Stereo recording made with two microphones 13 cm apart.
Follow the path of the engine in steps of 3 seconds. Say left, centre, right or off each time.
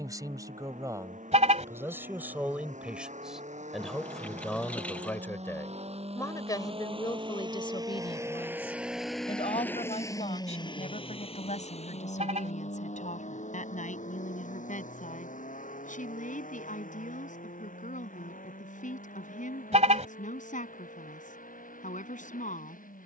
right, right, right, left, left, left, left, left.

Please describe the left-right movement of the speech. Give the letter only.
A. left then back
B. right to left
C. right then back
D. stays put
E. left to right
B.